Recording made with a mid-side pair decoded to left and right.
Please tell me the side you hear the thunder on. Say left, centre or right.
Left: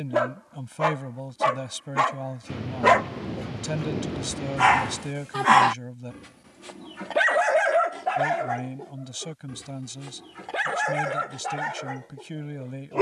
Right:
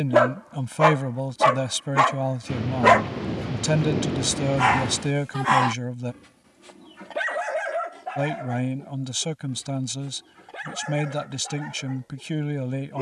right.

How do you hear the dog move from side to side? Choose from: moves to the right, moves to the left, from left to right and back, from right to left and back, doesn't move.
moves to the left.